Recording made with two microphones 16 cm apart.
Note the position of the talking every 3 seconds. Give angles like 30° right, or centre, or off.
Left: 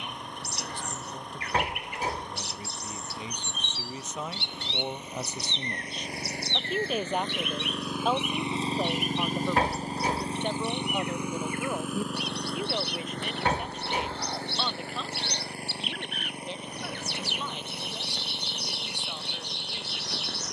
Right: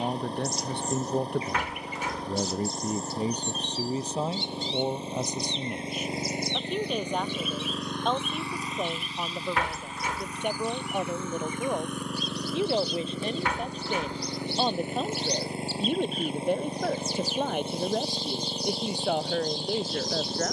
60° right, 30° right, centre, 10° right, 30° right, 50° right, 70° right.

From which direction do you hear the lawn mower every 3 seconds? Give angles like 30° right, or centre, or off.
30° right, 30° right, centre, 30° left, 10° right, 30° right, 30° right.